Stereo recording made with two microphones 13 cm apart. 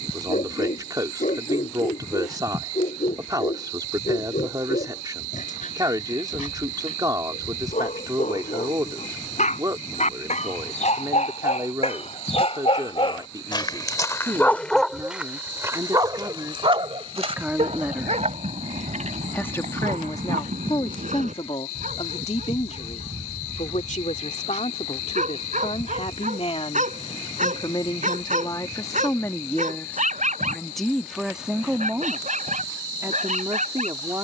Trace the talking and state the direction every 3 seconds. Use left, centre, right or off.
right, right, right, right, right, right, left, left, left, left, centre, right.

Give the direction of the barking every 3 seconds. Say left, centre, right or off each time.
left, left, left, left, left, right, right, right, right, right, right, right.